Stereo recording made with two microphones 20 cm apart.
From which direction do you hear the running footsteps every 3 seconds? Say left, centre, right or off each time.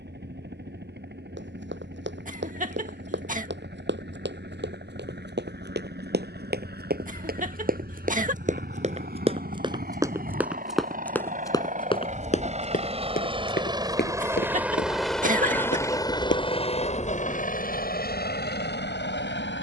right, right, right, centre, left, left, off.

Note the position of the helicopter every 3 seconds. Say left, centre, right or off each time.
right, right, right, right, right, left, left.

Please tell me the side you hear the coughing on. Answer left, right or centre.
right.